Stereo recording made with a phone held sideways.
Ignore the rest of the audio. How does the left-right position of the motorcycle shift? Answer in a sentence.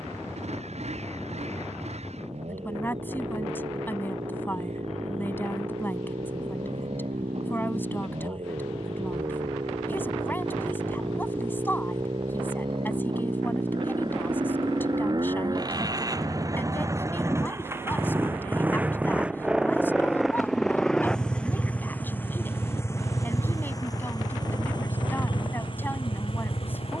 In this clip you hear the motorcycle move from right to left.